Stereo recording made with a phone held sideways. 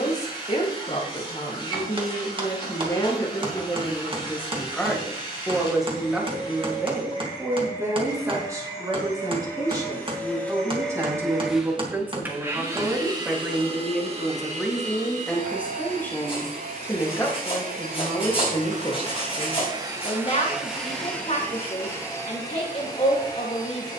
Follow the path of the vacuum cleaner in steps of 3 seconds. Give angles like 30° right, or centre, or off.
30° left, 30° left, 30° left, 10° left, 30° right, 70° right, 30° right, 20° left.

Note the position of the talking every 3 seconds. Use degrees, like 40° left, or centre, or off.
30° left, 10° left, 10° right, 20° right, centre, 10° left, 30° left, 40° left.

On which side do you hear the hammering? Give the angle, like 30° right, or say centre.
30° right.